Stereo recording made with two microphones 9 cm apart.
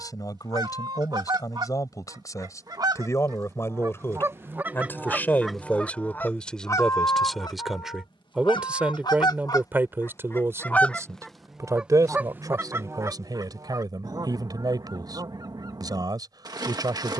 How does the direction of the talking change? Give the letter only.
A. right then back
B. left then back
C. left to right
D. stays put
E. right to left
C.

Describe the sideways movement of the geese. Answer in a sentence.
In this clip you hear the geese go left and come back.